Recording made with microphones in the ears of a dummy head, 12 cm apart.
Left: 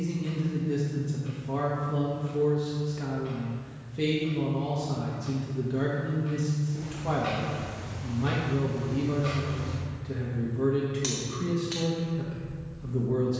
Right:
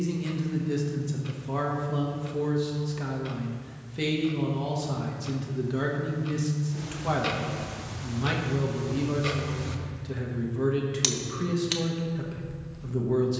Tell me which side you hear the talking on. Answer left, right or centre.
right.